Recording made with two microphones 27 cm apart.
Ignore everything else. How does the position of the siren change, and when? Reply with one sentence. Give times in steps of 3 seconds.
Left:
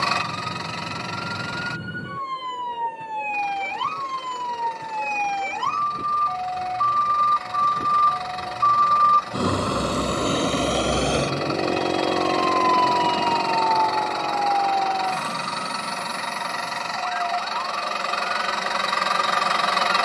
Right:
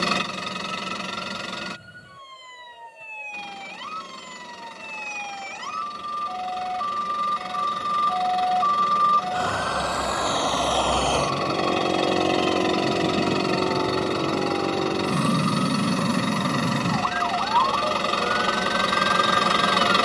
In this clip you hear the siren on the left from 0 s and on the right from 12 s.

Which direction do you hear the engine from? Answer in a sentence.
You can hear the engine on the right.